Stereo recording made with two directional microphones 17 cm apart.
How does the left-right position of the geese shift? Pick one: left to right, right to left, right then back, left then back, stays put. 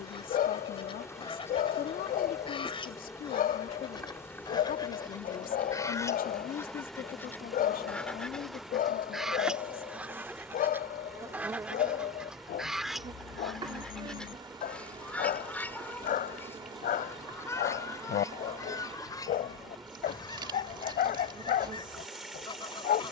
right then back.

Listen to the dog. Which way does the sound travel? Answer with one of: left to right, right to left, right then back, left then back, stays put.
stays put.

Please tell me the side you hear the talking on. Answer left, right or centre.
left.